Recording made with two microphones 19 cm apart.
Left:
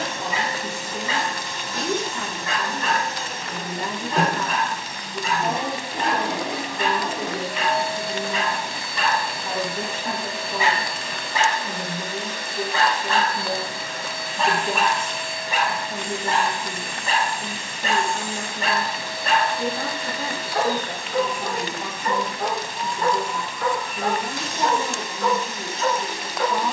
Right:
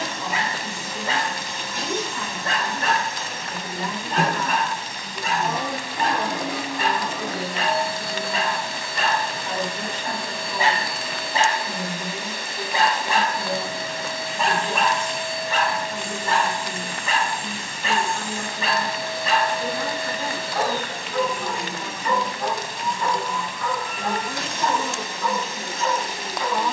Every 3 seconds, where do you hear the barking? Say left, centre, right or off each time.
right, right, right, right, centre, left, left, left, left.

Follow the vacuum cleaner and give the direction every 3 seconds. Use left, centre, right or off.
left, left, left, centre, right, right, right, right, right.